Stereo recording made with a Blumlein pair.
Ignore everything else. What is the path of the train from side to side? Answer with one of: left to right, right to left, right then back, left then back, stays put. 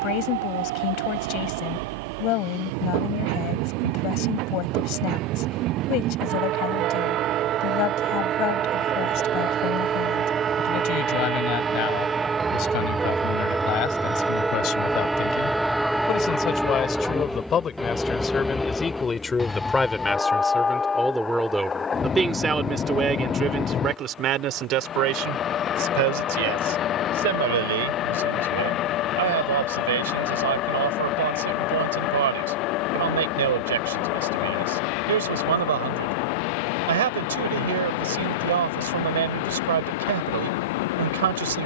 right to left.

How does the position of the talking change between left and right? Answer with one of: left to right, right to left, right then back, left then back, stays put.
left to right.